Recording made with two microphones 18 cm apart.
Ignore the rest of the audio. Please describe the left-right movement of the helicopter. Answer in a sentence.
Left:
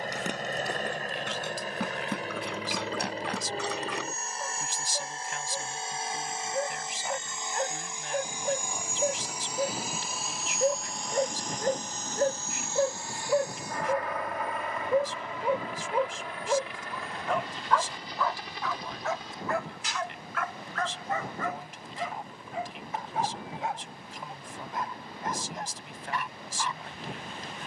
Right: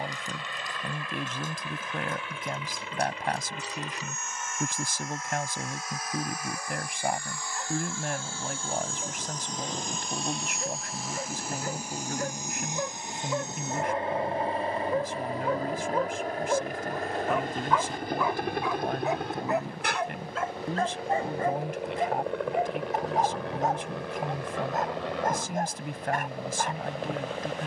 In this clip you hear the helicopter travel towards the right.